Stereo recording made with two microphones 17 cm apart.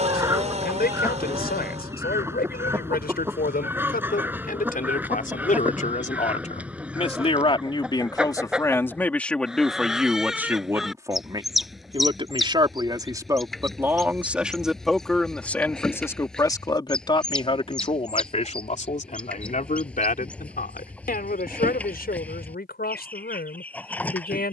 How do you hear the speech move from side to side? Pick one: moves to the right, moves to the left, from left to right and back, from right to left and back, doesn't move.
from left to right and back.